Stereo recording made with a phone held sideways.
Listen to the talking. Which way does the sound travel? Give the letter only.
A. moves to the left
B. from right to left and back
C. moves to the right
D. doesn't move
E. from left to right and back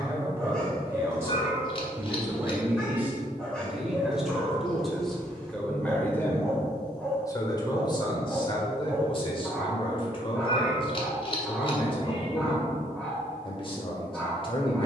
A.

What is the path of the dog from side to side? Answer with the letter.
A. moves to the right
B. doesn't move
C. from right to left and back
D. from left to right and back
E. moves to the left
B.